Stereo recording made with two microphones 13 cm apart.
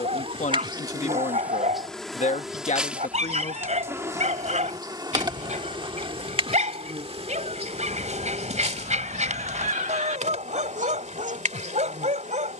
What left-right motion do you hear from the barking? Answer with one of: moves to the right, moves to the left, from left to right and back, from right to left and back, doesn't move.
doesn't move.